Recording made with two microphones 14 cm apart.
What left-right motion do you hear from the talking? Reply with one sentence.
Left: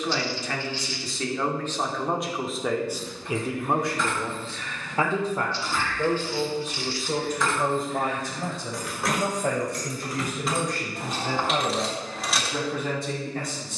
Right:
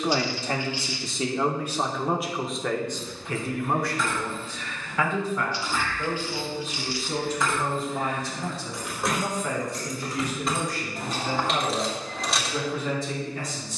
You can hear the talking move to the left.